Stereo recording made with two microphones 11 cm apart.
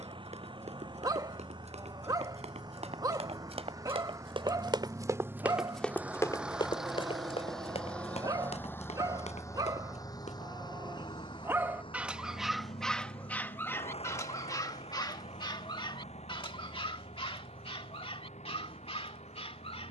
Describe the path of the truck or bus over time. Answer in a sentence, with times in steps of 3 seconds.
You can hear the truck or bus on the right from 0 s, in the centre from 6 s and on the left from 9 s.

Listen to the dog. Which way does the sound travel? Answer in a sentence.
In this clip you hear the dog move from right to left.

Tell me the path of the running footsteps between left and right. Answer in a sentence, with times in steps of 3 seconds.
In this clip you hear the running footsteps on the right from 0 s, on the left from 6 s and not at all from 12 s.